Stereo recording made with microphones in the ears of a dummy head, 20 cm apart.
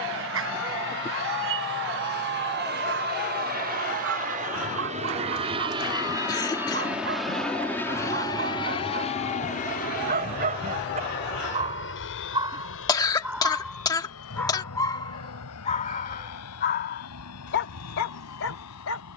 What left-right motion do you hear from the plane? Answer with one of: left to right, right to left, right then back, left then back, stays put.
right to left.